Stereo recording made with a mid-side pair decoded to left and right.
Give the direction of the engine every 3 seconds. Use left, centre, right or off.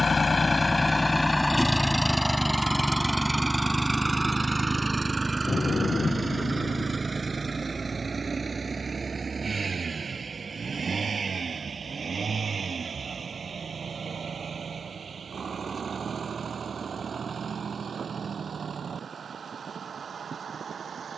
centre, right, right, right, right, right, right.